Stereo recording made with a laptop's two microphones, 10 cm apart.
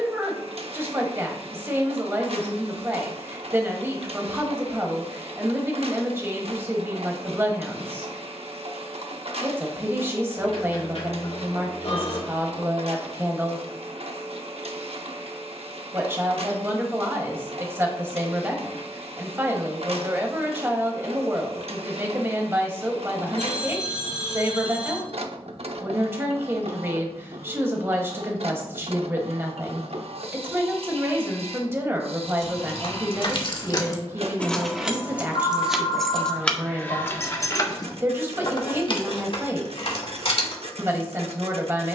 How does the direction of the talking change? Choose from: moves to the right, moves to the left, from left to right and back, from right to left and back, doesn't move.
doesn't move.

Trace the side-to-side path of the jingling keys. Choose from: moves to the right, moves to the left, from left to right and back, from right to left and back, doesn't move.
from left to right and back.